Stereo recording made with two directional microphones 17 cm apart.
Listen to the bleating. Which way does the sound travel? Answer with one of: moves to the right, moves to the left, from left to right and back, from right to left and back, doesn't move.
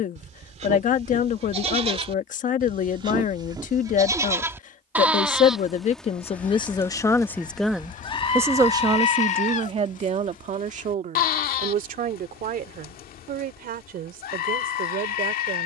moves to the left.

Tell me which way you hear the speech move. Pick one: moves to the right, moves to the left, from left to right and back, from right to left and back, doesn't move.
moves to the right.